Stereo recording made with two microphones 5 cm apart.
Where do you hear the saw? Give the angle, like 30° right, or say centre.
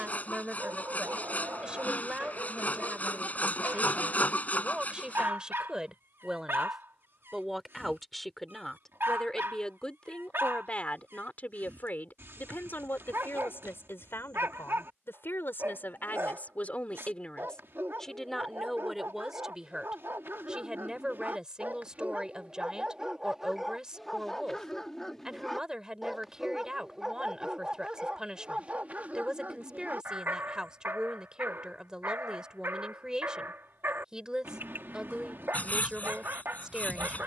30° left.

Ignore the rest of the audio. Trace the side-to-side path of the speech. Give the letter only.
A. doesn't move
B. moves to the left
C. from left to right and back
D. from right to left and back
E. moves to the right
D.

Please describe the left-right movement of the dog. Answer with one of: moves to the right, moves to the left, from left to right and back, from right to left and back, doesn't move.
from right to left and back.